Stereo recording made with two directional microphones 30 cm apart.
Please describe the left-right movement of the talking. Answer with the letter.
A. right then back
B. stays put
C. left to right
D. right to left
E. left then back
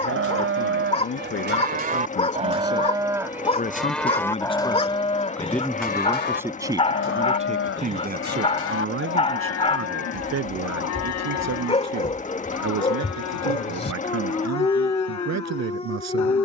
C.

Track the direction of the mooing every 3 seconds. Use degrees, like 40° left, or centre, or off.
30° right, 10° left, 40° left, 60° left, 70° left, 70° left.